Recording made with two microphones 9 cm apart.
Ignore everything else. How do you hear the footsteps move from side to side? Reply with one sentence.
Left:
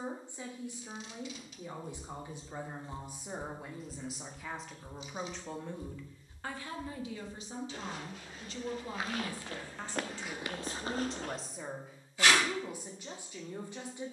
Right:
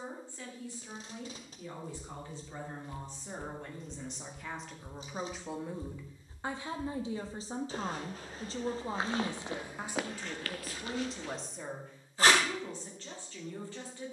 In this clip you hear the footsteps move from left to right and back again.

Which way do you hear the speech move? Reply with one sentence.
You can hear the speech move from left to right and back again.